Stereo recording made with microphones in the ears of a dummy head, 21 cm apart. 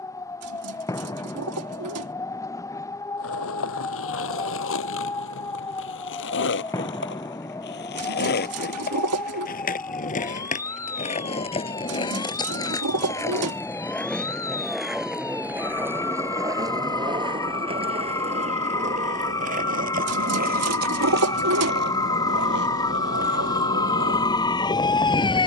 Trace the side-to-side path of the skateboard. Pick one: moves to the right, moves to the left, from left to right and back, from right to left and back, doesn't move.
moves to the right.